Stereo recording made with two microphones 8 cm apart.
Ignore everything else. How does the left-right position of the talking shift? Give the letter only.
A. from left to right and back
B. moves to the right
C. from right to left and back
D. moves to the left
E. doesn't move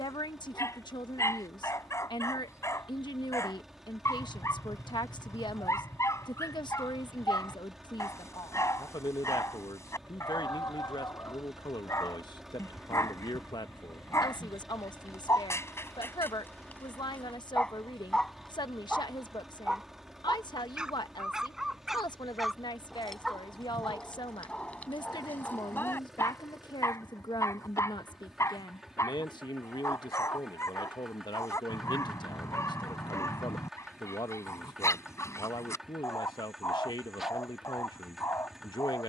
E.